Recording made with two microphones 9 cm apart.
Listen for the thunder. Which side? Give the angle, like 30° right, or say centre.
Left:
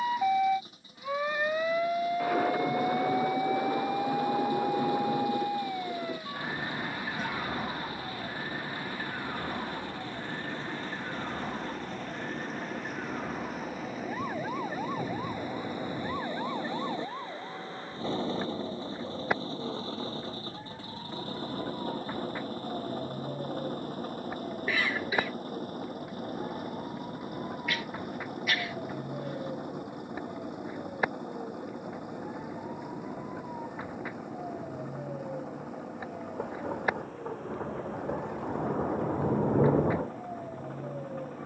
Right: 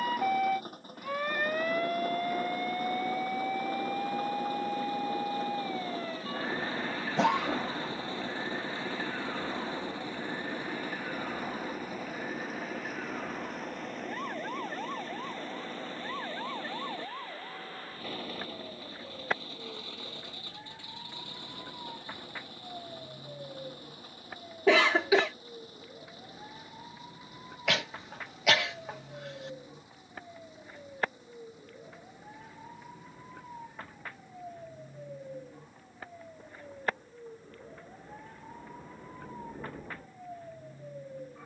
70° left.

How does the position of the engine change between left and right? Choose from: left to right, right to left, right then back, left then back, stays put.
right to left.